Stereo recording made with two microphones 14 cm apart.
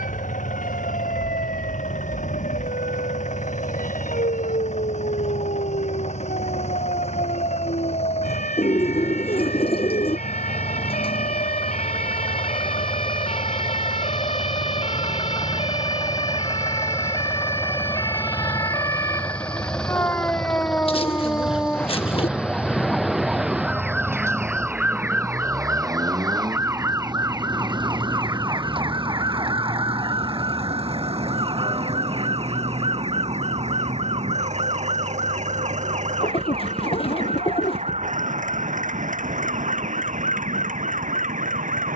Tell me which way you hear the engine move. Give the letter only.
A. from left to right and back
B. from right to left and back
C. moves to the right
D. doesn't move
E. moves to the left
C.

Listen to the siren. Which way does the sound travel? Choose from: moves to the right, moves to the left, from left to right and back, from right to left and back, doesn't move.
moves to the right.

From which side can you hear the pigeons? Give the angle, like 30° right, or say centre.
40° left.